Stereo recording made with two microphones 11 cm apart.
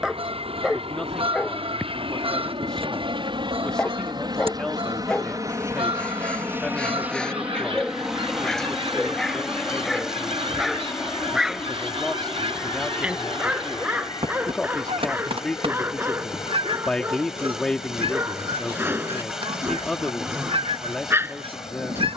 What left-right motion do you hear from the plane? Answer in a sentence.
You can hear the plane move to the left.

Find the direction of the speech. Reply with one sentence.
In this clip you hear the speech in the centre.